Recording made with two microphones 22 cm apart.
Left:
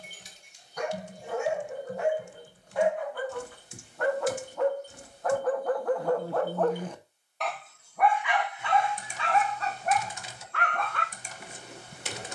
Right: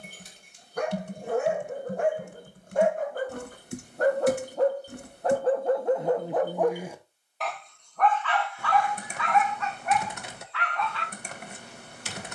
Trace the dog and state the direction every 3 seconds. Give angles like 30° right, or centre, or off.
50° right, 30° right, centre, 40° left.